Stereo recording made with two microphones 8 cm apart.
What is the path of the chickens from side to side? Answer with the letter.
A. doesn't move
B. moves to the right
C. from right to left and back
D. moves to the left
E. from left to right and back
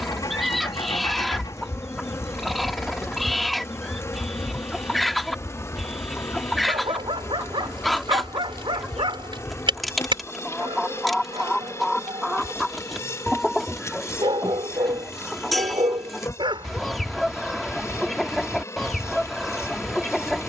A.